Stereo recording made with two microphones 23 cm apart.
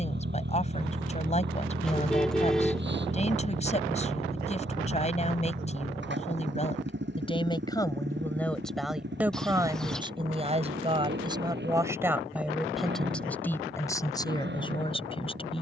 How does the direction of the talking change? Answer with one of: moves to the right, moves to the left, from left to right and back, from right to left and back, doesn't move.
from left to right and back.